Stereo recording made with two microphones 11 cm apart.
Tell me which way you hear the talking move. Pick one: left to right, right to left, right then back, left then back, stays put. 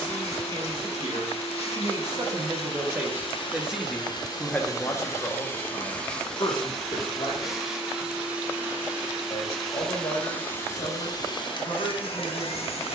right to left.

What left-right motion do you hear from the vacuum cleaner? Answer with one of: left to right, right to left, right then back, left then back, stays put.
right then back.